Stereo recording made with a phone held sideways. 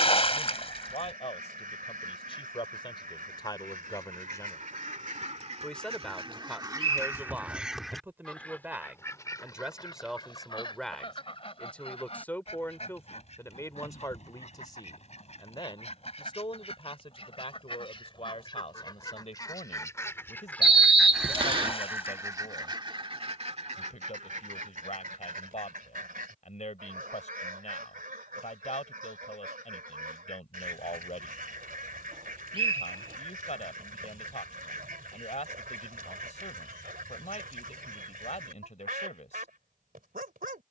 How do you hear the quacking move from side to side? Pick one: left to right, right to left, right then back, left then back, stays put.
left then back.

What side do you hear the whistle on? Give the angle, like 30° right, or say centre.
40° right.